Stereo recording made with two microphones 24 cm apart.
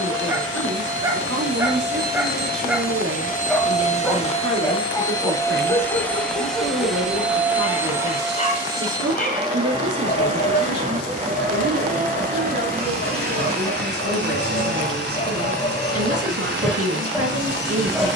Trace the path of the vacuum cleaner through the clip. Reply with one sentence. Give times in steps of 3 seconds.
In this clip you hear the vacuum cleaner on the left from 0 s, in the centre from 6 s and on the right from 9 s.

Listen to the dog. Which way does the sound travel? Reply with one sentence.
You can hear the dog move from right to left and back again.